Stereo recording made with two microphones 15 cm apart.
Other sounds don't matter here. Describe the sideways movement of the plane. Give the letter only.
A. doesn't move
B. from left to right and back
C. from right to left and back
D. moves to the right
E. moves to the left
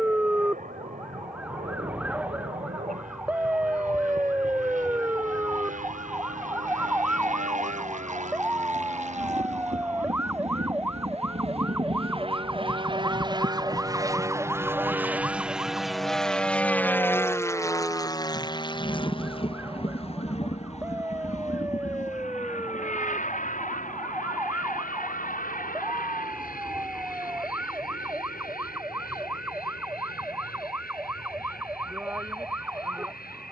E.